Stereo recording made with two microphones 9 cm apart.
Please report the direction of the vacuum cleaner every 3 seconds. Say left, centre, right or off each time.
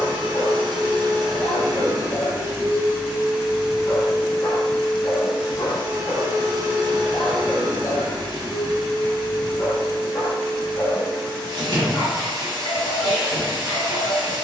right, centre, right, right, right.